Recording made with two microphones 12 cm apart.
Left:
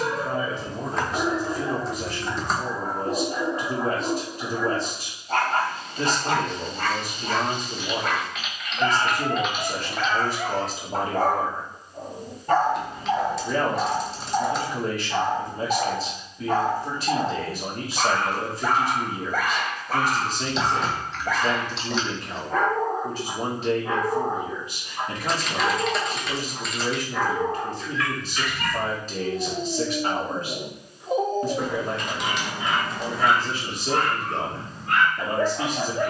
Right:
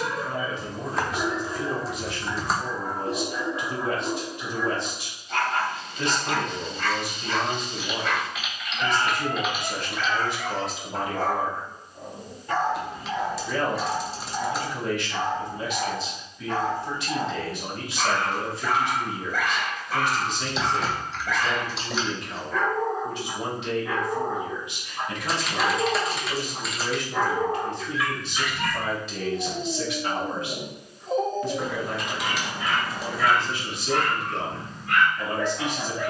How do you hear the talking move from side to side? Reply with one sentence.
In this clip you hear the talking stay in one place.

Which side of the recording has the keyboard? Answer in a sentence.
In this clip you hear the keyboard in the centre.